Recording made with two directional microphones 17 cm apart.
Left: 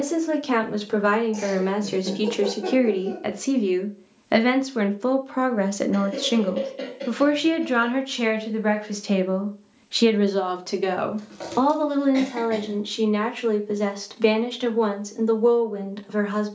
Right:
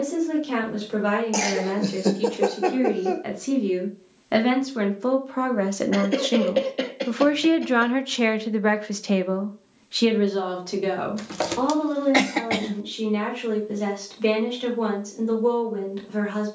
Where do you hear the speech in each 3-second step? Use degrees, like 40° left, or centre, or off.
50° left, 30° left, 20° right, 30° left, 50° left, 50° left.